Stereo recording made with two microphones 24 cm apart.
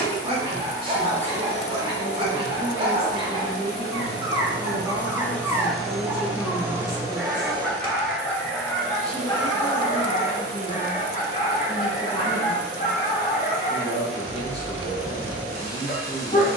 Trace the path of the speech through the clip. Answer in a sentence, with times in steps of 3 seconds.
You can hear the speech on the right from 0 s, in the centre from 3 s and on the left from 9 s.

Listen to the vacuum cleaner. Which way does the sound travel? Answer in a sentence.
You can hear the vacuum cleaner move to the right.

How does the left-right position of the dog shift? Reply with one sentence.
In this clip you hear the dog go from the right side to the left.